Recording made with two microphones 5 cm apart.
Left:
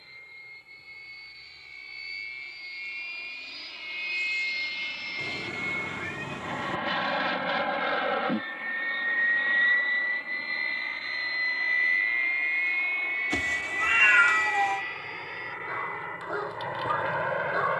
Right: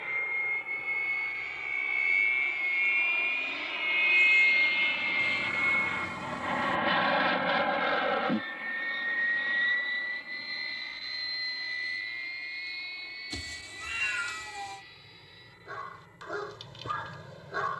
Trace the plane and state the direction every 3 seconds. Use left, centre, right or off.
right, right, centre, left, left, left.